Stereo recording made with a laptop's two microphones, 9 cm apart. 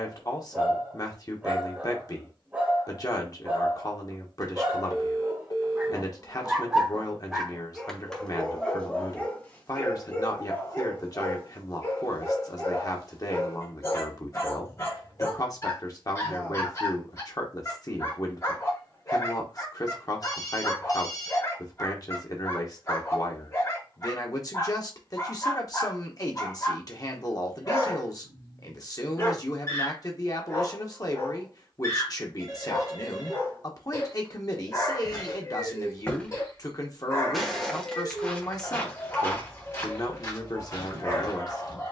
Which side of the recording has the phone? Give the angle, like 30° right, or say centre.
40° left.